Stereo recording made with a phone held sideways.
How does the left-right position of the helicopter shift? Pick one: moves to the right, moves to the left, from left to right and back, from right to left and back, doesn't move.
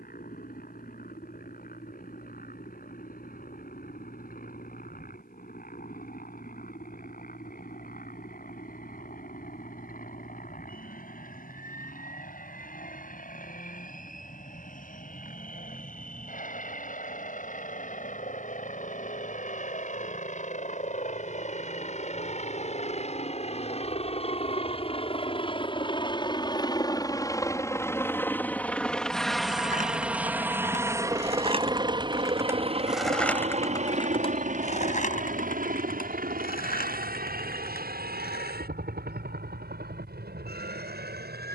moves to the right.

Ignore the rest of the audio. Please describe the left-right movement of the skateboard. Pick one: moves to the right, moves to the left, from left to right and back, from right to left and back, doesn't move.
moves to the left.